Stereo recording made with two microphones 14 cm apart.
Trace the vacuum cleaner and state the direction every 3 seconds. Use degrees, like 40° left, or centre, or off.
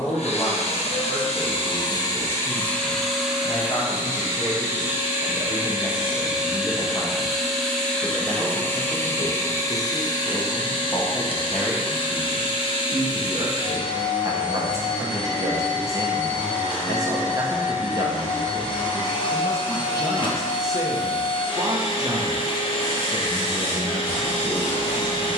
40° left, 10° right, centre, 30° left, 40° left, 40° left, 40° left, 40° left, 40° left.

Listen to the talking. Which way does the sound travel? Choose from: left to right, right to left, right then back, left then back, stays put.
left to right.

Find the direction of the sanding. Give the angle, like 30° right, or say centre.
30° left.